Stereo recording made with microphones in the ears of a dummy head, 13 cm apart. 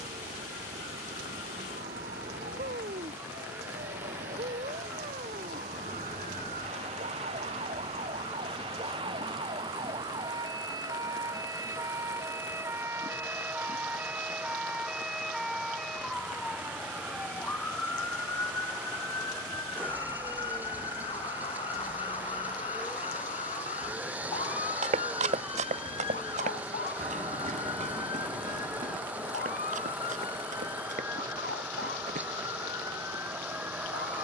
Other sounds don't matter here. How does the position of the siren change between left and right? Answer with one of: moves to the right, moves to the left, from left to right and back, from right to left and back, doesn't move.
moves to the left.